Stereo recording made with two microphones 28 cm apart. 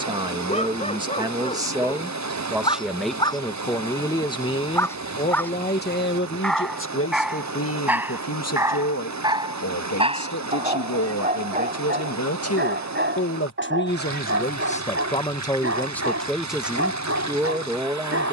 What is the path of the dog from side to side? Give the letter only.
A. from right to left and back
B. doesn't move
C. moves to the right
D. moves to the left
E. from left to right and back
C.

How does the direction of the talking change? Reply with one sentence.
In this clip you hear the talking move from right to left and back again.